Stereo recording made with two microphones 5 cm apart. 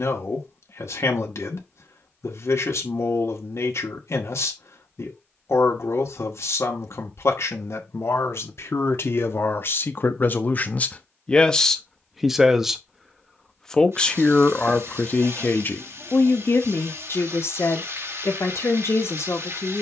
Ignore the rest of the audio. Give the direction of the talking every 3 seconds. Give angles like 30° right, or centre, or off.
70° left, 70° left, 70° left, 40° left, 10° left, 50° left, 70° left.